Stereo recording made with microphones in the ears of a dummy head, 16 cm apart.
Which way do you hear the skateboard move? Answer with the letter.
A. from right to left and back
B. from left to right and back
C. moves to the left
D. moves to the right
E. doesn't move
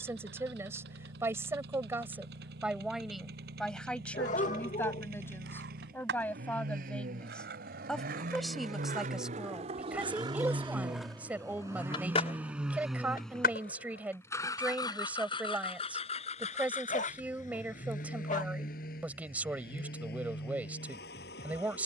C.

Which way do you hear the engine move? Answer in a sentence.
You can hear the engine go from the right side to the left.